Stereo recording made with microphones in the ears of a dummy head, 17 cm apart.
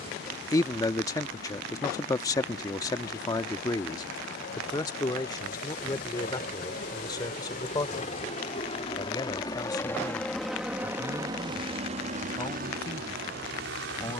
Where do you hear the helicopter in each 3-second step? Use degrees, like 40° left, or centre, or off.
60° left, 60° left, 40° left, centre, 50° right.